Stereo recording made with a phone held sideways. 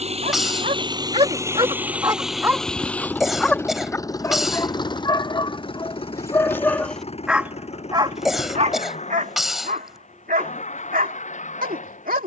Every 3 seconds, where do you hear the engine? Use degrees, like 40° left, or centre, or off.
20° right, 30° left, 40° left, 50° left.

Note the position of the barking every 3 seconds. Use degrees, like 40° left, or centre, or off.
30° right, 20° left, centre, 70° right.